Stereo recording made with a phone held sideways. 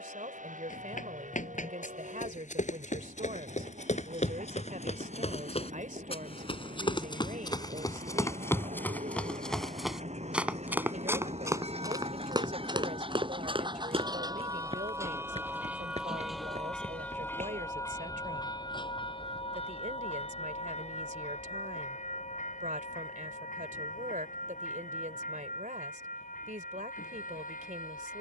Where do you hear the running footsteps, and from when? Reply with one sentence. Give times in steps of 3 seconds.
You can hear the running footsteps on the left from 0 s, in the centre from 9 s, on the right from 12 s and not at all from 18 s.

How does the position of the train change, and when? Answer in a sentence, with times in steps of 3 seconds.
You can hear the train on the right from 0 s, in the centre from 15 s and on the left from 18 s.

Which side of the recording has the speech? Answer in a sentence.
In this clip you hear the speech on the right.